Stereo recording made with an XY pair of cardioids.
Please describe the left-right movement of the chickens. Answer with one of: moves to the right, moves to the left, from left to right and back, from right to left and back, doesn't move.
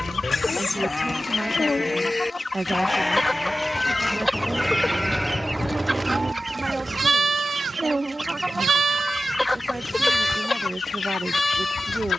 from left to right and back.